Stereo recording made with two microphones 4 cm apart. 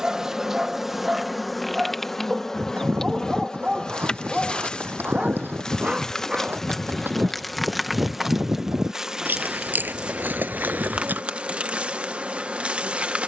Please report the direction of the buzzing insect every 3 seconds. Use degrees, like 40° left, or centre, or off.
centre, 20° left, centre, 30° right, 30° right.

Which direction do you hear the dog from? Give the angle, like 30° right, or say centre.
20° right.